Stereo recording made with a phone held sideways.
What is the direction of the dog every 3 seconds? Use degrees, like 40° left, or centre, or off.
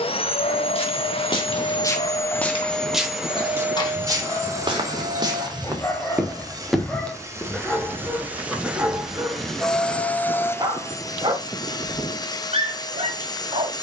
40° left, 30° left, centre, 20° right, 40° right.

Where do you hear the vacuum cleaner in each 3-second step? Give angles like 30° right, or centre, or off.
30° left, 20° right, 20° right, 10° left, 30° left.